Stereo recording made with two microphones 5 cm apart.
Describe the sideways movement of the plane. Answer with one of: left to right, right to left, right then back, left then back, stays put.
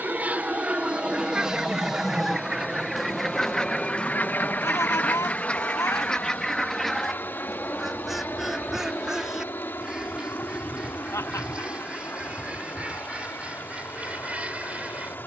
right to left.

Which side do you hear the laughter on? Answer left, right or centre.
left.